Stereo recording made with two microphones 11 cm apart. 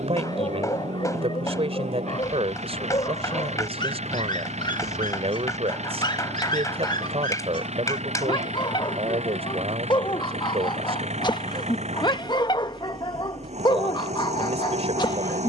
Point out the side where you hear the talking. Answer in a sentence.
In this clip you hear the talking on the right.